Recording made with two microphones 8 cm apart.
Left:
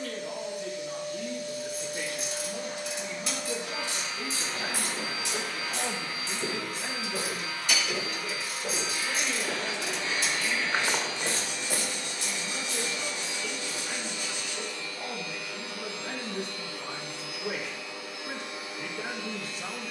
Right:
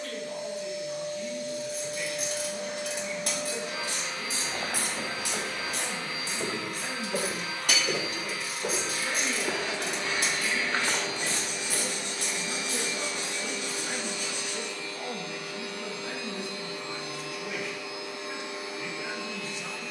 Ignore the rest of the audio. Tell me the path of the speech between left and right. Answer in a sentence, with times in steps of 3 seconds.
You can hear the speech on the left from 0 s, in the centre from 6 s, on the right from 9 s and on the left from 15 s.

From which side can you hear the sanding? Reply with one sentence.
In this clip you hear the sanding on the right.